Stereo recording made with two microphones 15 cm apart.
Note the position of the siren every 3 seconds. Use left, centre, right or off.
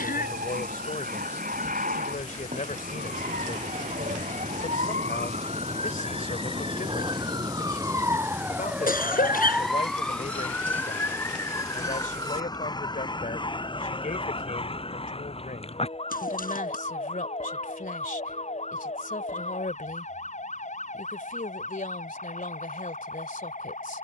right, right, right, centre, left, left, left, left.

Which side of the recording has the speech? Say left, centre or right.
left.